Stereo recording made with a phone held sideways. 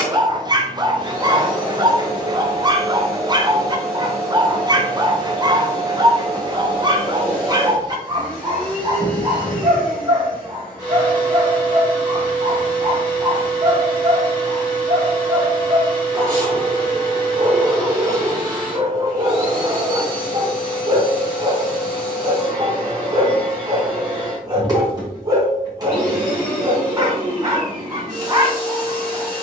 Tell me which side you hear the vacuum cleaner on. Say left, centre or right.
right.